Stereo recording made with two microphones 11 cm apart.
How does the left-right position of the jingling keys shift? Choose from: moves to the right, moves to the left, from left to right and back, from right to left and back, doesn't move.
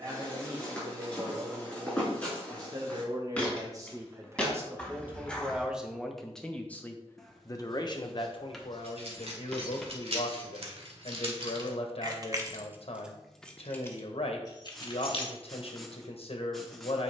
moves to the left.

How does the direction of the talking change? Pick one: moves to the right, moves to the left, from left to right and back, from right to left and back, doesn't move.
moves to the left.